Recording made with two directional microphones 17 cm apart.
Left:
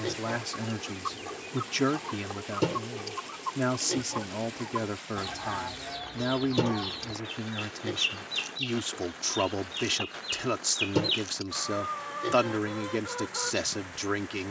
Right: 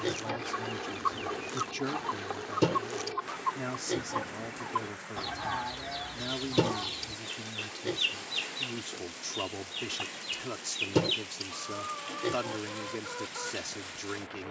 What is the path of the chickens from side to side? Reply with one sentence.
In this clip you hear the chickens travel towards the left.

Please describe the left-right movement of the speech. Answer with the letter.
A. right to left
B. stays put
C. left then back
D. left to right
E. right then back
B.